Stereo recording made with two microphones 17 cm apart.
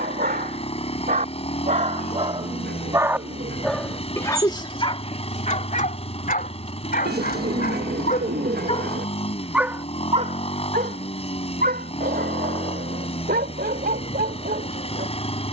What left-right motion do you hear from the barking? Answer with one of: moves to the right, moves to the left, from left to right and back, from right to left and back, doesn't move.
from right to left and back.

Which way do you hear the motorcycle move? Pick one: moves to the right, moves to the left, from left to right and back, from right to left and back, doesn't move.
doesn't move.